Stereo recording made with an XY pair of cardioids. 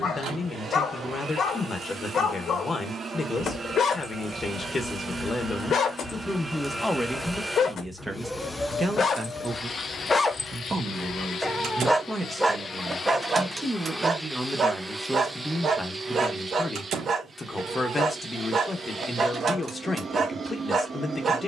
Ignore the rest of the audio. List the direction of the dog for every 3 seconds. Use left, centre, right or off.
left, left, left, left, right, right, right.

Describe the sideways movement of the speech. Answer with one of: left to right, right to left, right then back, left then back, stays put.
right then back.